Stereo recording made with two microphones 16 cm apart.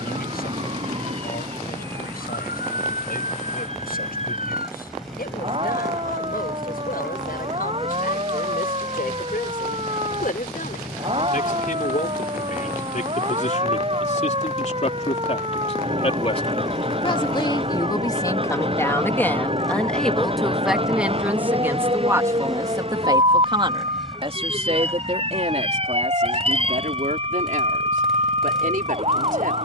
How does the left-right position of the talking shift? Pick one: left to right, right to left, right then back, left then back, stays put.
left to right.